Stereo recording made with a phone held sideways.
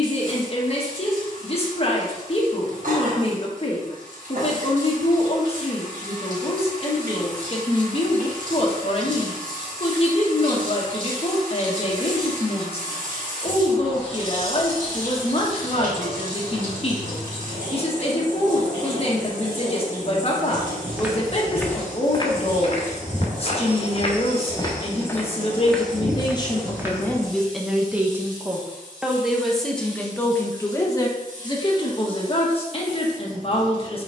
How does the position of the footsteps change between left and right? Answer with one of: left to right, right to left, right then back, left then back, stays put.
left then back.